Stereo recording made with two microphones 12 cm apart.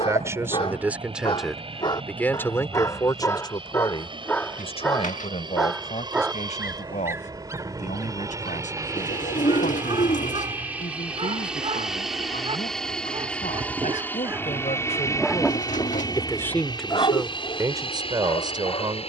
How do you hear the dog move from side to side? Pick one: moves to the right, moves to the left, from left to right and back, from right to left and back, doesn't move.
from left to right and back.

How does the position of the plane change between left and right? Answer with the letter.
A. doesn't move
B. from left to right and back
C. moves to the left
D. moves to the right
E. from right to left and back
C.